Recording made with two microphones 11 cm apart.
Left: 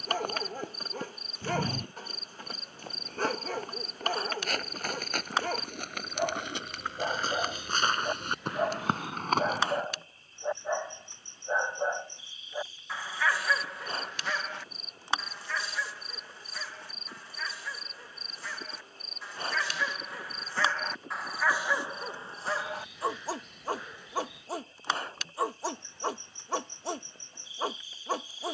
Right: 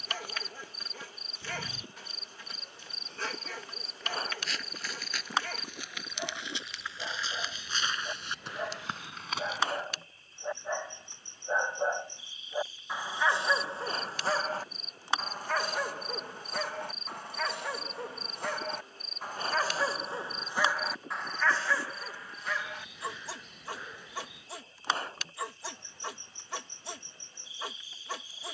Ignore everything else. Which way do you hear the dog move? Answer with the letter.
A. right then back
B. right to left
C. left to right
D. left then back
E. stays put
A.